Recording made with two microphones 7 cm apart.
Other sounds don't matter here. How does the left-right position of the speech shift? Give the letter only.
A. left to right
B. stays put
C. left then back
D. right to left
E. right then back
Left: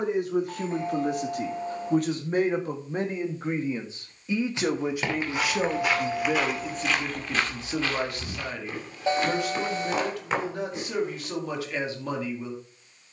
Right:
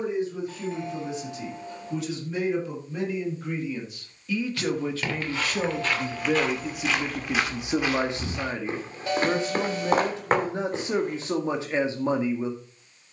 A.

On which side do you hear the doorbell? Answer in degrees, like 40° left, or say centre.
30° left.